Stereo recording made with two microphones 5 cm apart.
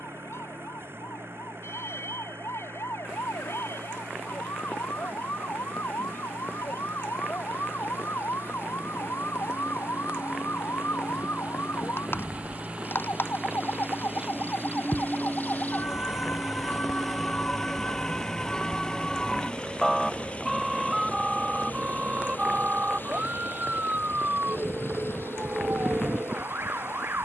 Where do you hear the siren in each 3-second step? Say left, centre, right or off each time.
left, left, left, left, left, left, centre, right, right.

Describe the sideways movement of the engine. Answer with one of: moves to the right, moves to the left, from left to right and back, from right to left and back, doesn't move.
moves to the left.